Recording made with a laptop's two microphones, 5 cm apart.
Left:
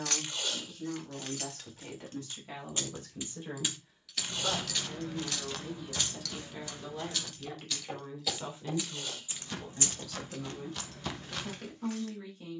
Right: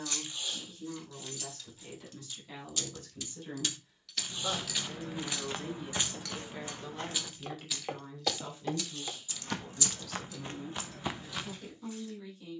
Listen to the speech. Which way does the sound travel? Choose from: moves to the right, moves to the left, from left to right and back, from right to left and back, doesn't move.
from left to right and back.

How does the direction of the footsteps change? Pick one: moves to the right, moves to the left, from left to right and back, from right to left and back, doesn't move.
from left to right and back.